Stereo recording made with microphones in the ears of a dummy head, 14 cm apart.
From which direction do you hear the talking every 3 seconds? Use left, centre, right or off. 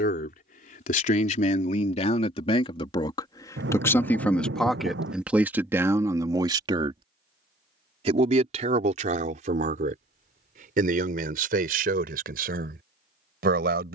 left, centre, right, right, right.